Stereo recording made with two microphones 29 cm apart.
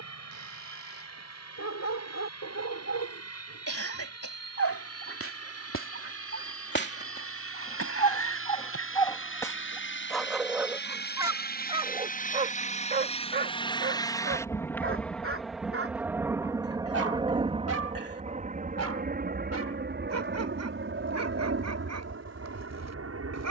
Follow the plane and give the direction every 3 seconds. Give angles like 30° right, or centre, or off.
70° left, 60° left, 50° left, 40° left, 20° left, 10° right, 30° right, 40° right.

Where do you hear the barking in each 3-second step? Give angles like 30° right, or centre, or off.
60° left, 50° left, 30° left, centre, 30° right, 50° right, 60° right, 70° right.